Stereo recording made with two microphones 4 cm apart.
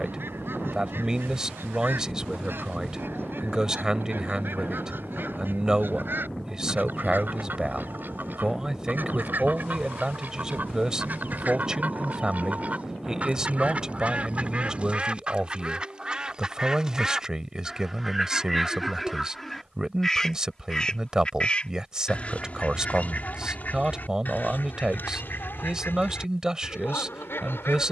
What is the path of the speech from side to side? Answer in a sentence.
In this clip you hear the speech stay put.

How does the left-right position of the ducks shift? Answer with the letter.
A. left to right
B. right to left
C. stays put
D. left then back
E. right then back
B.